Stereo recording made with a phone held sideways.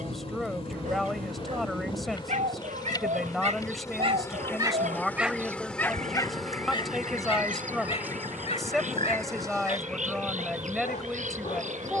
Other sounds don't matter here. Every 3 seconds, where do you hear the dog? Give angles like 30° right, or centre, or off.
70° right, 20° right, 40° left, 60° left.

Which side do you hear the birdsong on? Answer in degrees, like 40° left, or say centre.
70° right.